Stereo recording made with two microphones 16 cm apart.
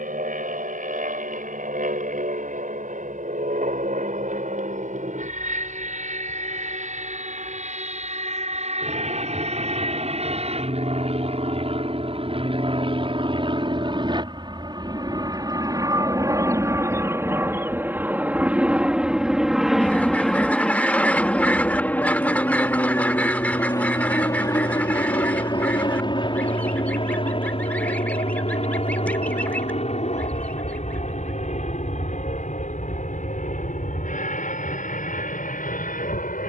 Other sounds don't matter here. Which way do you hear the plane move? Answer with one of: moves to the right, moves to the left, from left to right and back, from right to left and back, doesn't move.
moves to the left.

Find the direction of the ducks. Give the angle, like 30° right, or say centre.
10° left.